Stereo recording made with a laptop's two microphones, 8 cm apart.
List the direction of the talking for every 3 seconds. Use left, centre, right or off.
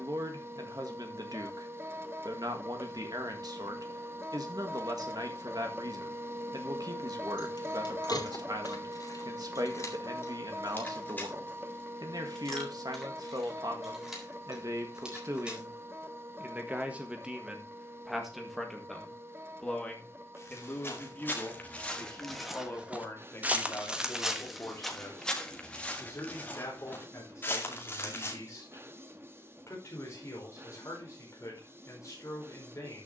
right, right, right, right, right, right, centre, left, left, left, left.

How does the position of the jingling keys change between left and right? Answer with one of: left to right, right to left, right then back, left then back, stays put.
left to right.